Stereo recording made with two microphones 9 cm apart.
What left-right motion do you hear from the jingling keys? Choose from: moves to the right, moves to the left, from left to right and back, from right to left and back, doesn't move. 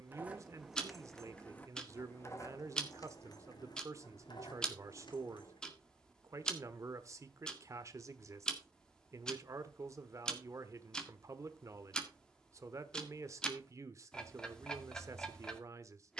moves to the left.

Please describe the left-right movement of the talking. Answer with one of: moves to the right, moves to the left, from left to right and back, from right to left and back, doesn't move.
doesn't move.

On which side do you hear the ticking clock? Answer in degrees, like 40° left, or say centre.
10° left.